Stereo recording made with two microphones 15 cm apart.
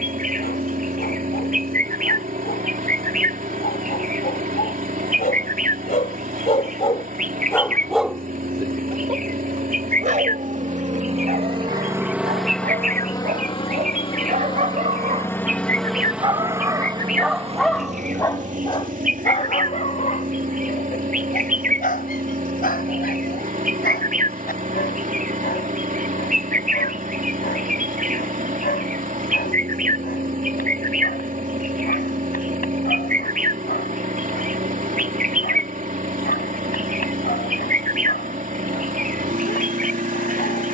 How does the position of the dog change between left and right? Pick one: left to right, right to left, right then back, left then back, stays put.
right then back.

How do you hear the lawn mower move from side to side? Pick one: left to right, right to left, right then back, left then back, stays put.
left then back.